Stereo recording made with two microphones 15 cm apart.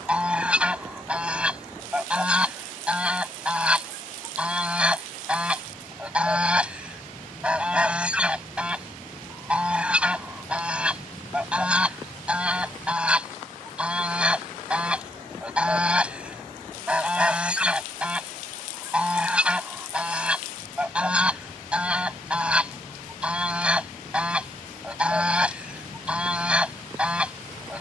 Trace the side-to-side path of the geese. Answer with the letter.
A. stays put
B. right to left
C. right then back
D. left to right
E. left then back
A.